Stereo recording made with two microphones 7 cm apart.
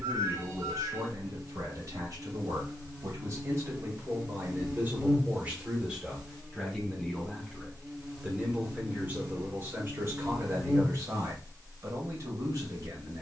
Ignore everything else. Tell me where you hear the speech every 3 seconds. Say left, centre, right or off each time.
right, right, centre, right, right.